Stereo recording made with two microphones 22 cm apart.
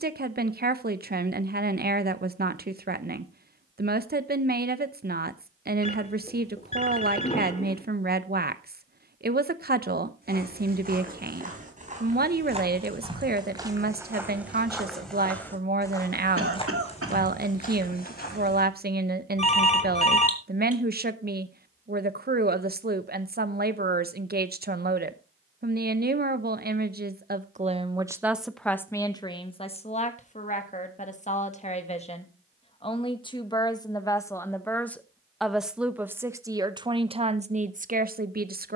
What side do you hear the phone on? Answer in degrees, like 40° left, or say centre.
30° left.